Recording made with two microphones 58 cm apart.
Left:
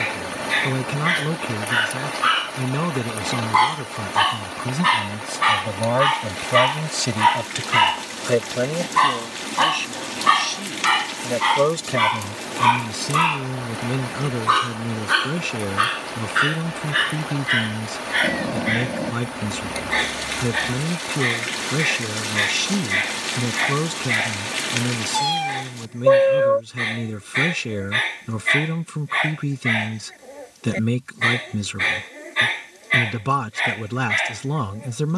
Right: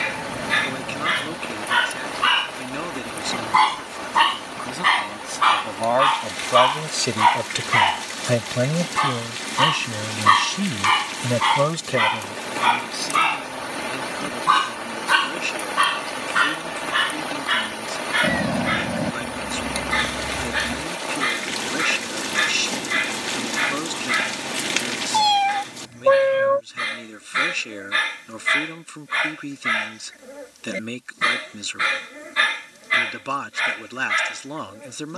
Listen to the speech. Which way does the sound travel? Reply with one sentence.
You can hear the speech go right and come back.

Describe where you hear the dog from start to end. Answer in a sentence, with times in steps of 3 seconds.
In this clip you hear the dog on the right from 0 s, on the left from 3 s, in the centre from 9 s and on the right from 15 s.